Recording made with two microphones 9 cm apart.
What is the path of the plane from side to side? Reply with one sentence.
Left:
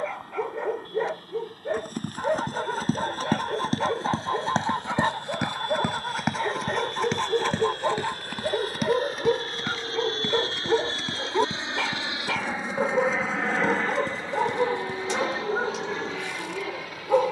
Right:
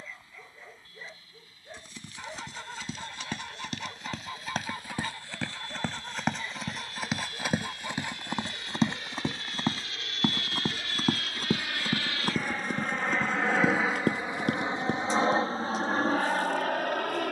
In this clip you hear the plane go from the left side to the right.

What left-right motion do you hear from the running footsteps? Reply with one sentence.
You can hear the running footsteps go from the left side to the right.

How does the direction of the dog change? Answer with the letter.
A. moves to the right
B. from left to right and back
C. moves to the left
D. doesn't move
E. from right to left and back
D.